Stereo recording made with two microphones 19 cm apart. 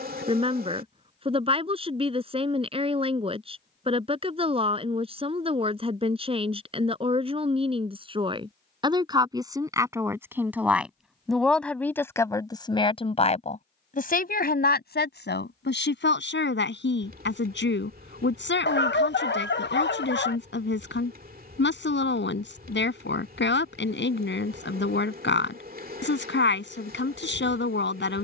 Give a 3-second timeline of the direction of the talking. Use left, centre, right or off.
right, right, right, centre, left, left, left, left, left, left.